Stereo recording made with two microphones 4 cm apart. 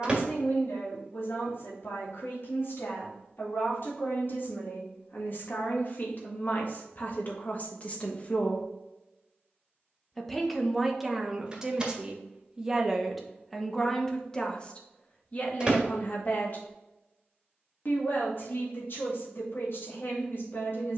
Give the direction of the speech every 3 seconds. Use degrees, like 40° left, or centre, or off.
60° left, 50° left, 40° left, 10° right, centre, 40° left, 60° left.